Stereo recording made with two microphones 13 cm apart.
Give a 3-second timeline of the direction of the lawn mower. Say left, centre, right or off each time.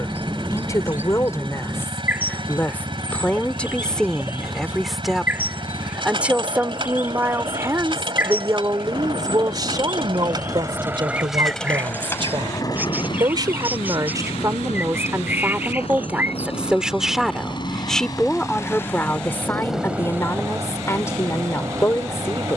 right, right, right, right, left, left, centre, right.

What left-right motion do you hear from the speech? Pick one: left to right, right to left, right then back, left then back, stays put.
right then back.